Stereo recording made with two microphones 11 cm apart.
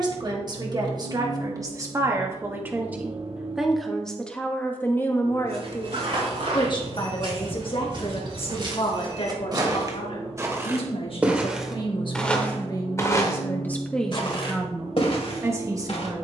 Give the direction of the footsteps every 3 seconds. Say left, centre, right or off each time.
off, right, right, right, left, left.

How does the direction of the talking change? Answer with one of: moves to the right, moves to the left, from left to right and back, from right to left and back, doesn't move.
from right to left and back.